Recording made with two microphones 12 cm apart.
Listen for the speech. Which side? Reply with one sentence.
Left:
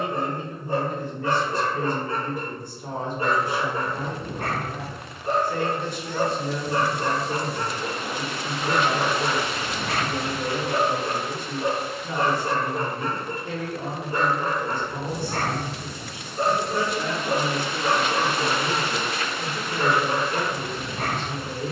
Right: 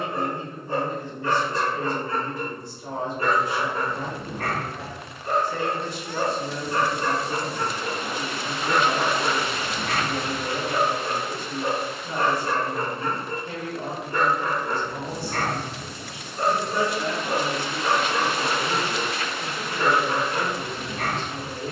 In this clip you hear the speech on the left.